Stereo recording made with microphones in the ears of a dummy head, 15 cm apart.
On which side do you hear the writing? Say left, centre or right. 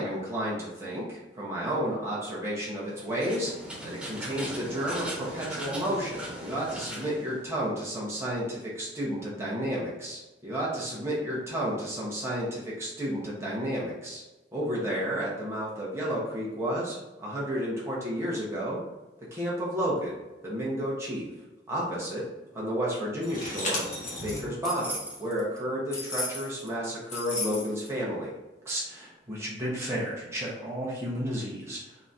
centre.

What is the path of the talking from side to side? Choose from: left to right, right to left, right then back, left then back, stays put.
stays put.